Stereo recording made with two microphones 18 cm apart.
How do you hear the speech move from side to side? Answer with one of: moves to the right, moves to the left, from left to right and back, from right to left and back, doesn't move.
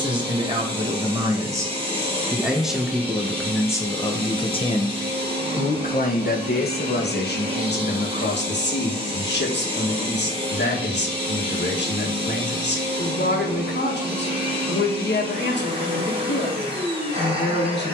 moves to the left.